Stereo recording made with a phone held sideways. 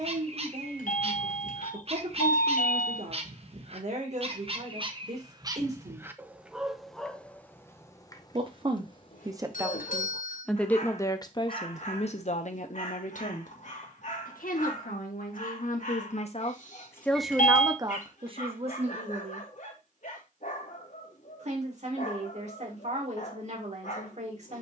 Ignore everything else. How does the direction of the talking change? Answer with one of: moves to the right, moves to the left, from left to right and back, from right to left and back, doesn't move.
from right to left and back.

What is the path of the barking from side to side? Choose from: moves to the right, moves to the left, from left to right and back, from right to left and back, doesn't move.
moves to the left.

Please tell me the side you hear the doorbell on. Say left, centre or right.
left.